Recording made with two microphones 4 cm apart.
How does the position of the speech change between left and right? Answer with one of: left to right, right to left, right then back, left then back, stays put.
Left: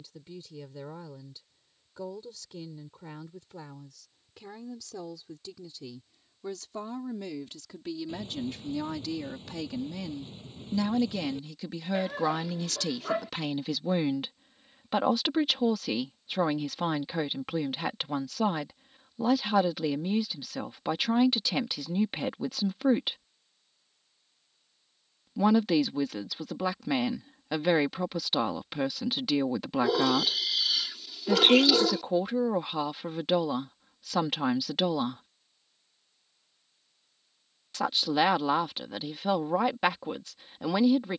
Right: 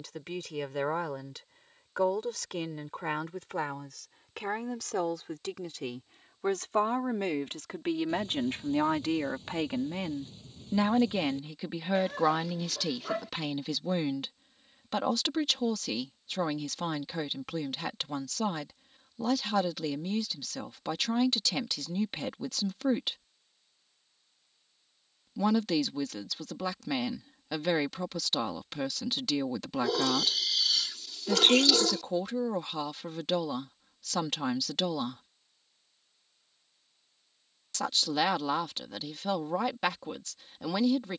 right to left.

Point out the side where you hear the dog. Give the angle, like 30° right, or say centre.
10° left.